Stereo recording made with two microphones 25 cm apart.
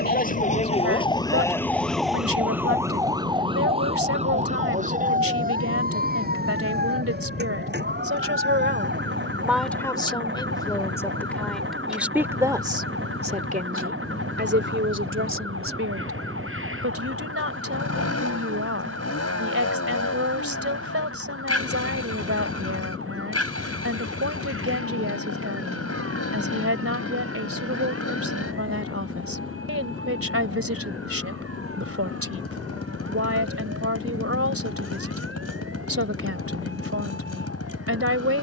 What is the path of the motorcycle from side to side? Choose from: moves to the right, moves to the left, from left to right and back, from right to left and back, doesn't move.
doesn't move.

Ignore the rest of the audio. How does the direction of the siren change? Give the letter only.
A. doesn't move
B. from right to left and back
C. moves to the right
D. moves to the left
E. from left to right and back
C.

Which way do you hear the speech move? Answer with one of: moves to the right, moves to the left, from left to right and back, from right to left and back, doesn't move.
from right to left and back.